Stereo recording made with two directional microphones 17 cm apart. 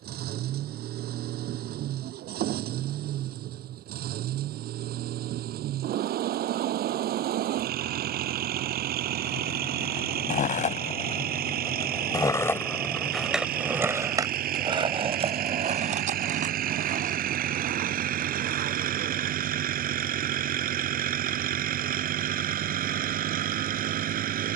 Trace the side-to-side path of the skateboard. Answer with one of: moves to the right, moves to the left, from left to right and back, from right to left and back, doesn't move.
moves to the right.